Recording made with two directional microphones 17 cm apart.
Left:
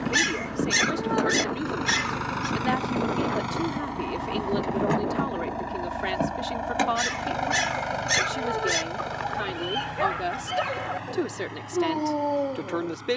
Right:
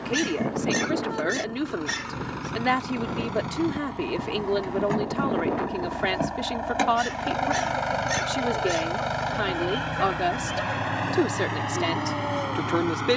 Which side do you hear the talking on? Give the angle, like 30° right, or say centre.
20° right.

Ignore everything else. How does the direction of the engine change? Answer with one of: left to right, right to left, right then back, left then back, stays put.
left to right.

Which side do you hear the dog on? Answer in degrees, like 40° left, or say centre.
40° left.